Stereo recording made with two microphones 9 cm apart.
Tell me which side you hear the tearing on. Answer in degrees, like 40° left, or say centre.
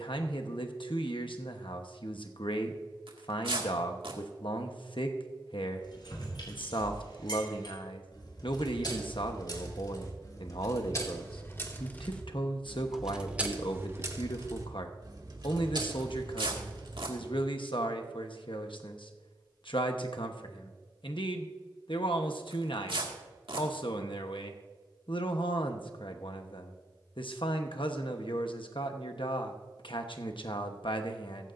80° right.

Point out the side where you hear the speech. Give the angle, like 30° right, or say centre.
80° left.